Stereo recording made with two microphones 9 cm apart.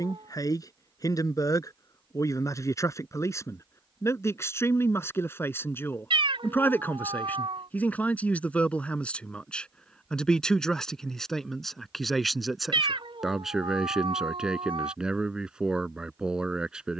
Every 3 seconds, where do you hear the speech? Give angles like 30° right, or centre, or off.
40° left, 30° left, 20° left, 10° left, centre, 10° right.